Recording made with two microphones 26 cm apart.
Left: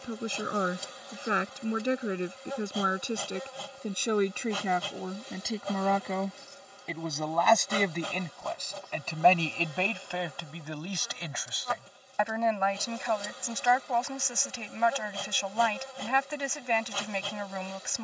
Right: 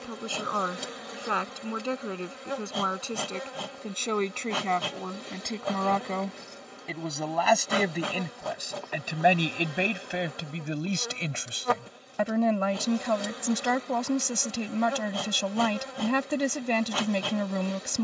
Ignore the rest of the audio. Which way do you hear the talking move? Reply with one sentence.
You can hear the talking move to the right.